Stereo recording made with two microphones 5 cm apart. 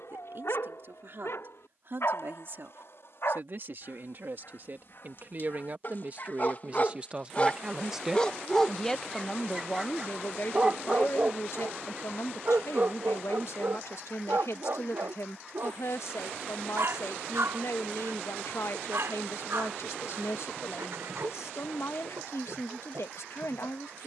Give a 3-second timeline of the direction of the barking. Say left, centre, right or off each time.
left, left, left, right, right, right, right, right.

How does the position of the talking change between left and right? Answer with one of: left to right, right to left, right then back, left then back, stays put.
right to left.